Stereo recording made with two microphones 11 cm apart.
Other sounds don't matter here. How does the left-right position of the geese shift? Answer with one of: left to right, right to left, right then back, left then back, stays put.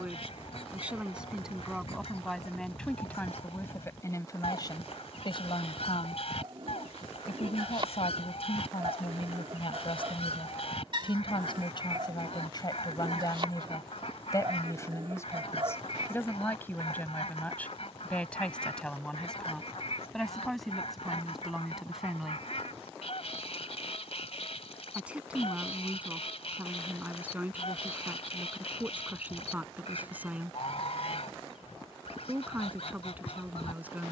stays put.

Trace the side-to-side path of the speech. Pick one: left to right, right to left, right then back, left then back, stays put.
left then back.